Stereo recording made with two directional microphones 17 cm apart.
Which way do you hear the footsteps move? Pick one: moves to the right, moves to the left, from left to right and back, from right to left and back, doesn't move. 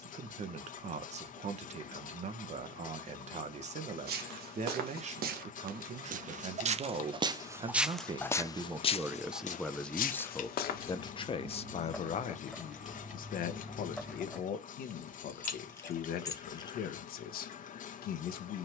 moves to the left.